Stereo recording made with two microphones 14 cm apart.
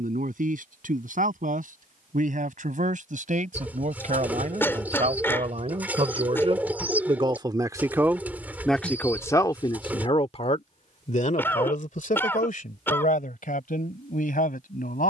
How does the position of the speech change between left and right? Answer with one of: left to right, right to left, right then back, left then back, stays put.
right to left.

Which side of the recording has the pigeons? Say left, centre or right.
centre.